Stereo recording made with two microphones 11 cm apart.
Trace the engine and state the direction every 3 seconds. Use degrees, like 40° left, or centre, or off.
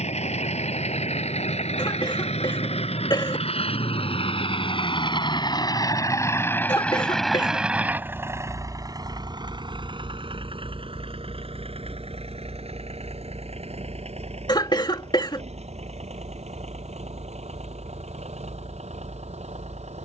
70° left, 50° left, centre, 50° right, 70° right, 70° right, 80° right.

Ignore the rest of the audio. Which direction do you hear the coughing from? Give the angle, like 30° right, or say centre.
40° left.